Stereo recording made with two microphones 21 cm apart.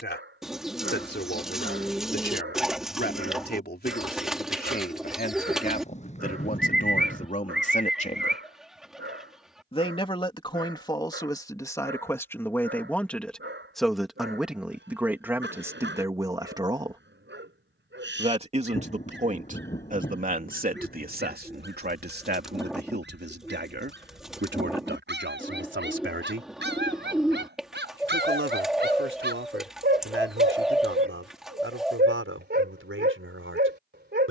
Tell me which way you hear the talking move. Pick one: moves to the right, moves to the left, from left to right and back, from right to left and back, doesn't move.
moves to the right.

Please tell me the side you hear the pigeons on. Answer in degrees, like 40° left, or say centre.
centre.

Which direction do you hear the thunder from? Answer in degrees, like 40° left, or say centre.
30° left.